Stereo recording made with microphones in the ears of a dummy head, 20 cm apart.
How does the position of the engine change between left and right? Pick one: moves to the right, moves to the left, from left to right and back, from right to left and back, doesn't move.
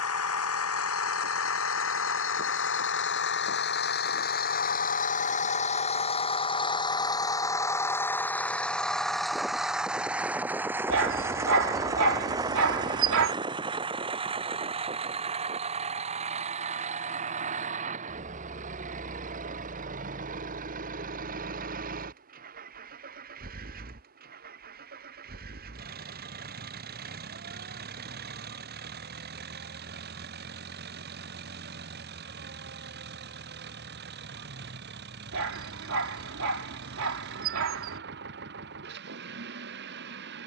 moves to the right.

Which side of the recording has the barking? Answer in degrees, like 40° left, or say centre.
60° right.